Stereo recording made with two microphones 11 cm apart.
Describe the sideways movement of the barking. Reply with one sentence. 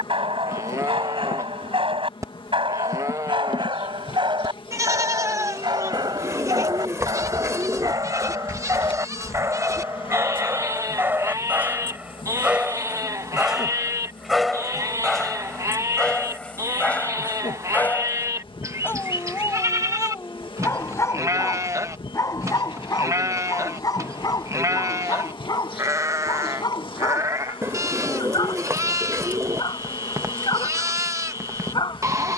You can hear the barking move to the left.